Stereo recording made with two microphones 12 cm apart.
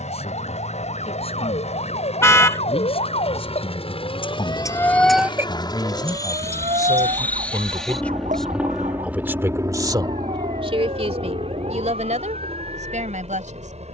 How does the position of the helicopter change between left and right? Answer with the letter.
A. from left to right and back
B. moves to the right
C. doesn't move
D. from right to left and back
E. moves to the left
B.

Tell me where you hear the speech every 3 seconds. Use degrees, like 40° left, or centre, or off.
50° left, 40° left, 20° left, 40° right, 80° right.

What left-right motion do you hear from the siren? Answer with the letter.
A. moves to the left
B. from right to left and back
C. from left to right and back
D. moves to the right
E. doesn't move
D.